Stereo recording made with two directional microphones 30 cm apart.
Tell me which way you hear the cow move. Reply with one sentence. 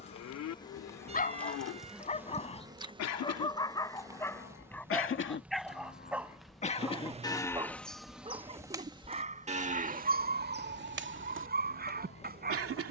In this clip you hear the cow go from the left side to the right.